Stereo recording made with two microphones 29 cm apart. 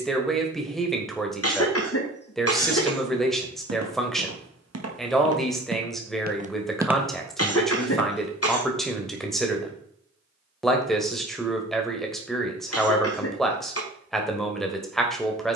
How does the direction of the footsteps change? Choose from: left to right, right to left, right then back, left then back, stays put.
right to left.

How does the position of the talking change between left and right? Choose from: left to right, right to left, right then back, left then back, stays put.
stays put.